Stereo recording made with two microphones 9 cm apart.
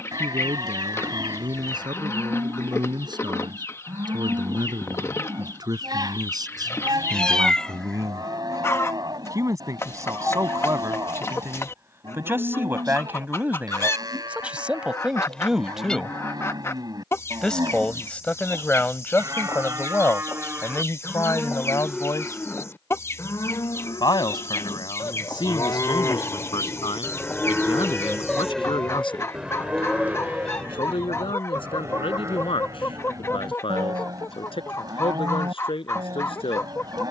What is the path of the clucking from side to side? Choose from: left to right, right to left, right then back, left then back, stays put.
stays put.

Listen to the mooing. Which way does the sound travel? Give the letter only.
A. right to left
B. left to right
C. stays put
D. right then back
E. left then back
E.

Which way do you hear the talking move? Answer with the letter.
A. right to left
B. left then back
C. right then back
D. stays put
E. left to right
A.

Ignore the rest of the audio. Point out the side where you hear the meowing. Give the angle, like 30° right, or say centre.
10° left.